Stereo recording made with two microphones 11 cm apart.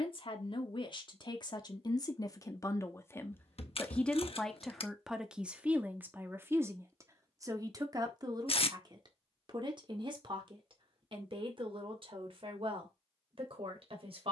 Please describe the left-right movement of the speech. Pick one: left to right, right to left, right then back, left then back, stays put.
left to right.